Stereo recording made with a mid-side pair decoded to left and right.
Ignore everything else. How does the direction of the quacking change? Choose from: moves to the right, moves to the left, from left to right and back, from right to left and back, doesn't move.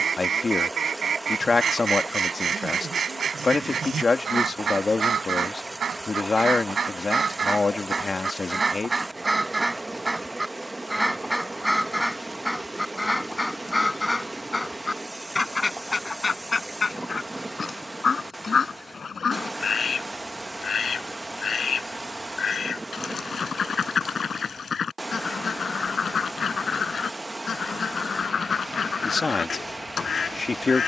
moves to the left.